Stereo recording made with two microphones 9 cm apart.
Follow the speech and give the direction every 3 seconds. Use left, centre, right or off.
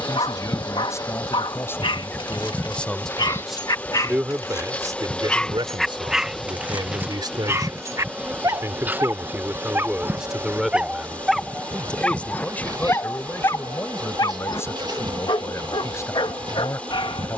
left, right, right, centre, left, left.